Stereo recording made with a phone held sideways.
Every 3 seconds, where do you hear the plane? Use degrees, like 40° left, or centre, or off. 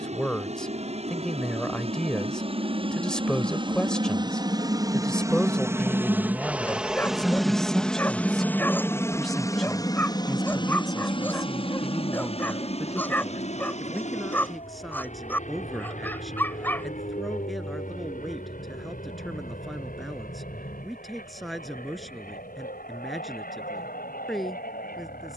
50° right, 30° right, centre, 30° left, 50° left, 60° left, 60° left, 70° left, 70° left.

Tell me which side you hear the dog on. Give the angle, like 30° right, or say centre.
10° left.